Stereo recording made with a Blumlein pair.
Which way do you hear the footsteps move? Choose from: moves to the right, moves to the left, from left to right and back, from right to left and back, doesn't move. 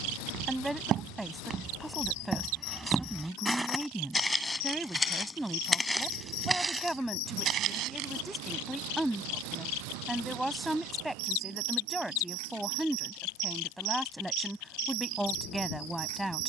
from right to left and back.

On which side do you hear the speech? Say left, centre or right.
centre.